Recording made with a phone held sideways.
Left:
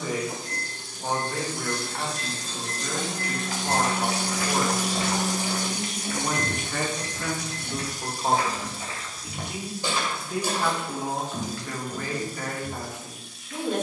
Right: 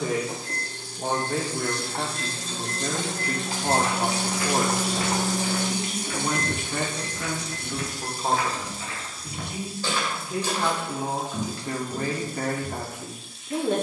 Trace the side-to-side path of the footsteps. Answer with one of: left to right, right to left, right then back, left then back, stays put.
left then back.